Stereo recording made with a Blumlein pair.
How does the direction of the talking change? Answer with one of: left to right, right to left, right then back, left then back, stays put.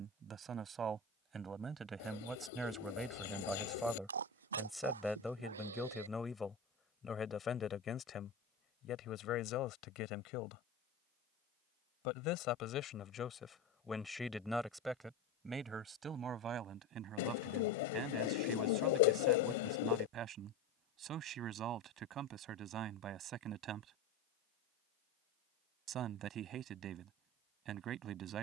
left then back.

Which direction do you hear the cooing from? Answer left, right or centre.
left.